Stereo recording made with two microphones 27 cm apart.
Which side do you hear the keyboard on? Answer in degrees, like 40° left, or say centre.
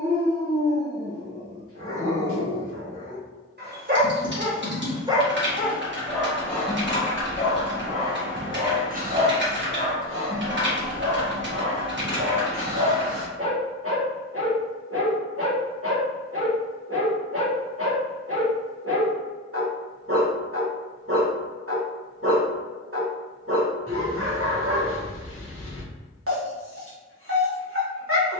50° right.